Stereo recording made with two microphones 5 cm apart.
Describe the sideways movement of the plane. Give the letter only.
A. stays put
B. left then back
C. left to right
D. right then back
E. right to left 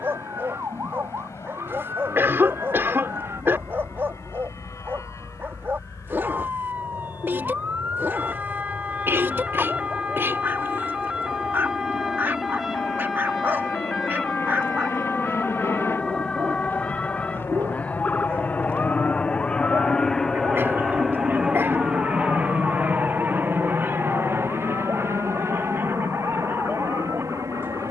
C.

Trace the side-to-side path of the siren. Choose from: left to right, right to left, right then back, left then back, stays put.
right to left.